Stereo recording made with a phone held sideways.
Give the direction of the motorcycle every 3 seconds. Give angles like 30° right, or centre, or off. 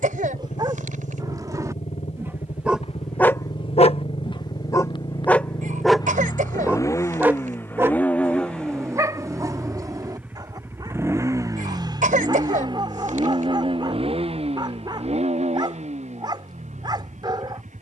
50° left, 40° left, 20° left, 10° right, 40° right, 50° right.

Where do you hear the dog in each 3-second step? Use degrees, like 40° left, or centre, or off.
20° right, 20° left, 20° right, 30° right, 30° right, 30° right.